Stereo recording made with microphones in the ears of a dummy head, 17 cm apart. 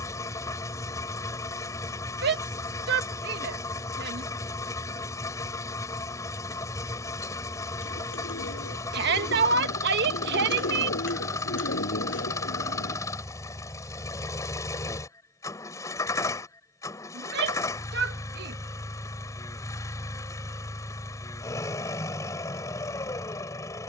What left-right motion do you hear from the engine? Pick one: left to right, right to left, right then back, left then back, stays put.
stays put.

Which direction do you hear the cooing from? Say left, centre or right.
left.